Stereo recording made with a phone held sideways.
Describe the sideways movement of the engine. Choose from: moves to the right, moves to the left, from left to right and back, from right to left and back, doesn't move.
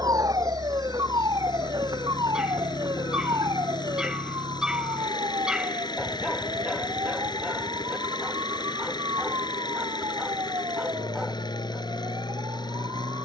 doesn't move.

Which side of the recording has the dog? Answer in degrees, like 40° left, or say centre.
centre.